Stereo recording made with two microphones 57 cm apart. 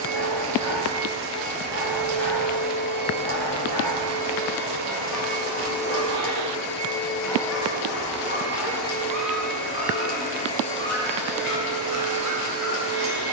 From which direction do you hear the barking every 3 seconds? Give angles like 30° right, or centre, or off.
50° left, 30° left, centre, 50° right, 70° right.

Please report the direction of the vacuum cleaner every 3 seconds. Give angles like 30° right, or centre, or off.
10° right, 30° left, 40° left, 10° left, 20° right.